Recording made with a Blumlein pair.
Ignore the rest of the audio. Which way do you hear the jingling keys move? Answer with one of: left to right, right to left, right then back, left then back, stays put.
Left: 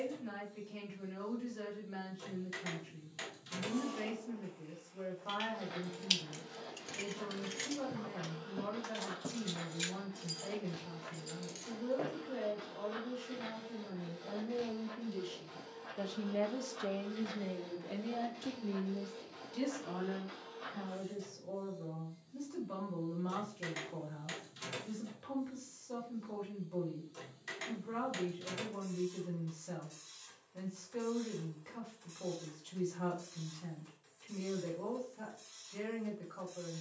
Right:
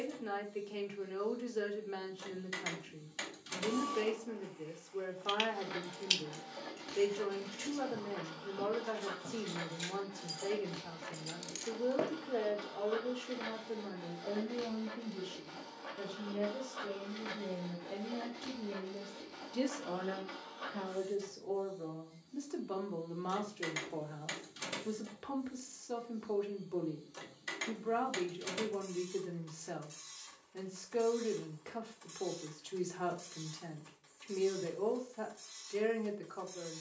left then back.